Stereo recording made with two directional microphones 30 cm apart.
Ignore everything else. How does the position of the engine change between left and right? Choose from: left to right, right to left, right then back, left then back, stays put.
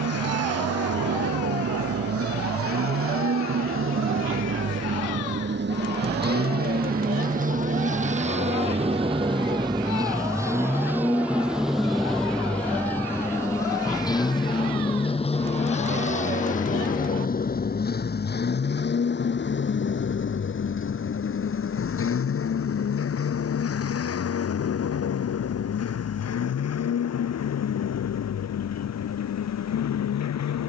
right to left.